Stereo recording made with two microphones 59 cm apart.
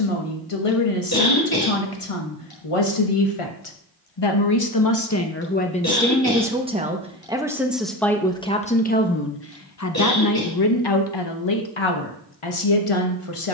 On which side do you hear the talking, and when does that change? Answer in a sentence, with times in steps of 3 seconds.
You can hear the talking on the left from 0 s, in the centre from 6 s and on the left from 9 s.